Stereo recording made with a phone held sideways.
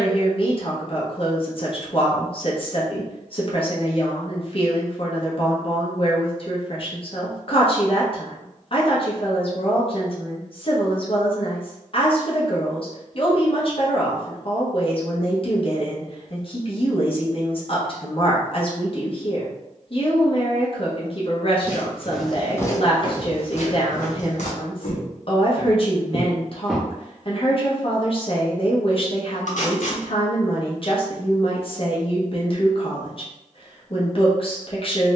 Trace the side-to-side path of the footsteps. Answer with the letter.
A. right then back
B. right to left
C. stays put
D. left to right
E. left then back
E.